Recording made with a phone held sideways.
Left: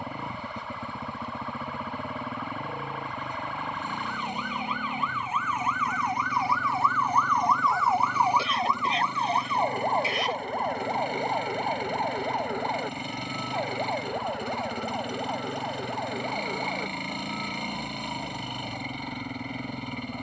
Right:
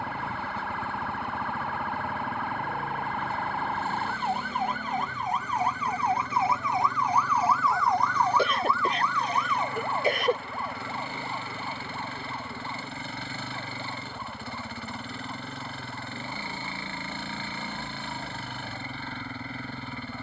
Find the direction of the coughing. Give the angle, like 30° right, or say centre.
50° right.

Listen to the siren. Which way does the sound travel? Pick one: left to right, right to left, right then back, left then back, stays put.
right to left.